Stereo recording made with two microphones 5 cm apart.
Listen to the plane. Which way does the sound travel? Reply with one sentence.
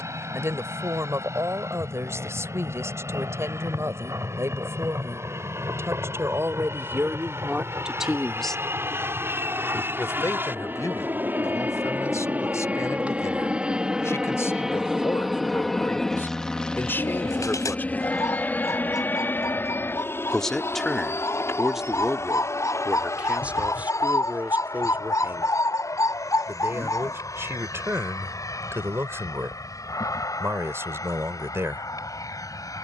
You can hear the plane move from right to left.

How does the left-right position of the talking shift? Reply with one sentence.
You can hear the talking go left and come back.